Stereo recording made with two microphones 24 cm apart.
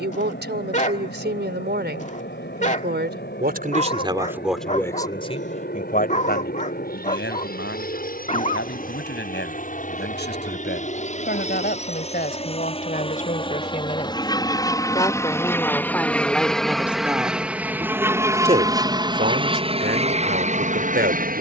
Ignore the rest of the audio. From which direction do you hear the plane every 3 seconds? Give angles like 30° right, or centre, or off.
50° left, 50° left, 40° left, 30° left, 20° left, centre, 20° right.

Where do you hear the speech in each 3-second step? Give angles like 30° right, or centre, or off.
50° right, 10° right, 50° left, 50° left, 30° left, centre, 40° right.